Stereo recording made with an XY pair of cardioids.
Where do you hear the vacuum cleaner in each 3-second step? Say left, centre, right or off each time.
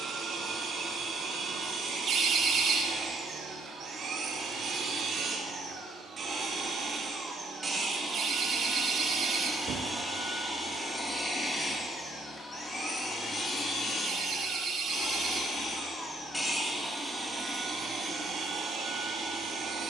right, right, right, centre, left, centre, right.